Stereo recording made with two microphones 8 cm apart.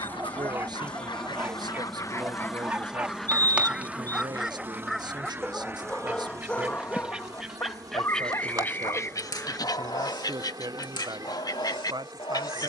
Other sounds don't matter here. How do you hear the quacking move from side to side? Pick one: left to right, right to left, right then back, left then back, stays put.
right then back.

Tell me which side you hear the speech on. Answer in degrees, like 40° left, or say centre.
60° right.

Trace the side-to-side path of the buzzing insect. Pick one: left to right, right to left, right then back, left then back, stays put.
left to right.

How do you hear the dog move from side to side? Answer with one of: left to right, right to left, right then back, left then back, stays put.
right to left.